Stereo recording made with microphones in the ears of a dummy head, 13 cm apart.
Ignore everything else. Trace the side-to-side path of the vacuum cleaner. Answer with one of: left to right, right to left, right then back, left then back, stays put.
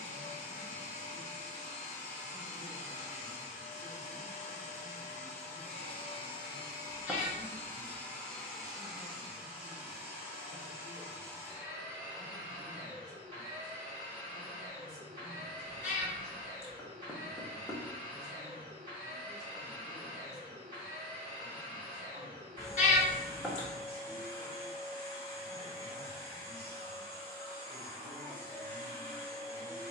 left to right.